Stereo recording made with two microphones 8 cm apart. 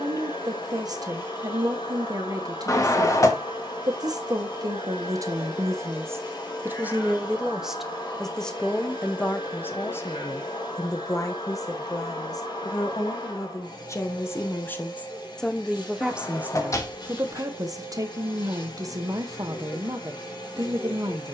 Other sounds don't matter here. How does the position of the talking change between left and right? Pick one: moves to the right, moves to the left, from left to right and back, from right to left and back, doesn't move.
from right to left and back.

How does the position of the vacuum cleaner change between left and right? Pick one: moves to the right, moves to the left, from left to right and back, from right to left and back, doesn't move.
doesn't move.